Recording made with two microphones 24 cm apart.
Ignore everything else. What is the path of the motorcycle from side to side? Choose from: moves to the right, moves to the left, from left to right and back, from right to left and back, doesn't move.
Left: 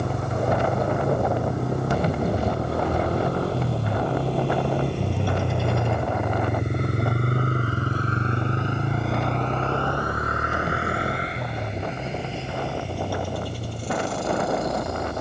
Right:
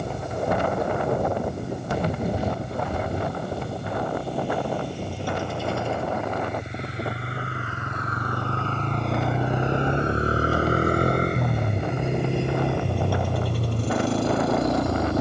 moves to the right.